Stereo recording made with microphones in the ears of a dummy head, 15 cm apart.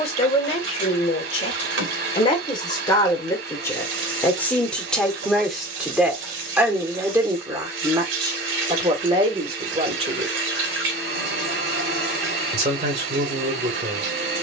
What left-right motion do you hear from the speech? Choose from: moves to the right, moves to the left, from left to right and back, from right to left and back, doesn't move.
moves to the right.